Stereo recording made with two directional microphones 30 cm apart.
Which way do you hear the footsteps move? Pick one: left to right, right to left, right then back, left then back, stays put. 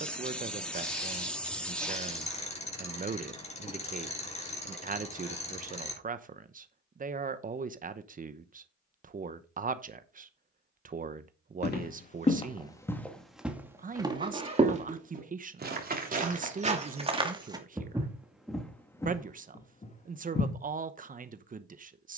right then back.